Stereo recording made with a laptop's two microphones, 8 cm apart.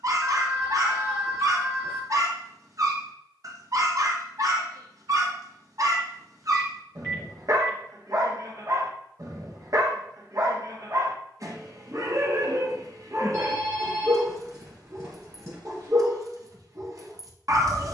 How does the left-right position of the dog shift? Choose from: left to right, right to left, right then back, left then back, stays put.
stays put.